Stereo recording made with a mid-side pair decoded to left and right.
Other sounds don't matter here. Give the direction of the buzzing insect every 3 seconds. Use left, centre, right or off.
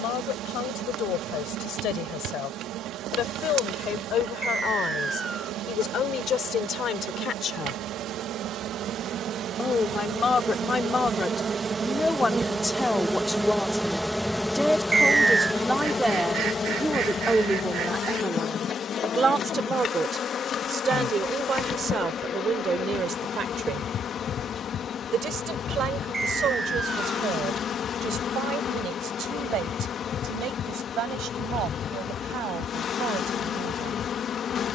right, right, right, right, centre, left, left, left, left, left, left, left.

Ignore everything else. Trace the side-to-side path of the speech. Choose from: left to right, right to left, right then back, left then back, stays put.
left to right.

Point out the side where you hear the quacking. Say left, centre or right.
right.